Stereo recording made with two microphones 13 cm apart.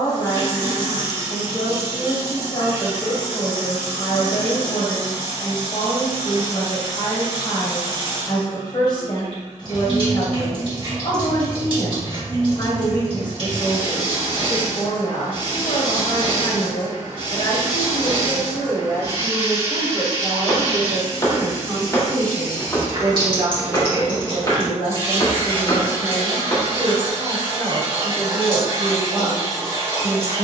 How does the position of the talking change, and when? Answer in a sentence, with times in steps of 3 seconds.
You can hear the talking on the left from 0 s, in the centre from 18 s and on the right from 21 s.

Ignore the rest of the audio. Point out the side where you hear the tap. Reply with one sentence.
You can hear the tap on the right.